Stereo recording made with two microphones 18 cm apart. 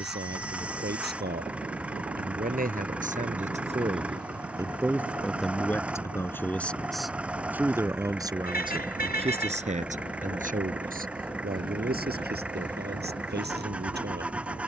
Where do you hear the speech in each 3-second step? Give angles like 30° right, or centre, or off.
60° right, 20° right, 10° right, 50° right, 60° right.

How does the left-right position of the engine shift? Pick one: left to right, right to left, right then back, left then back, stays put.
stays put.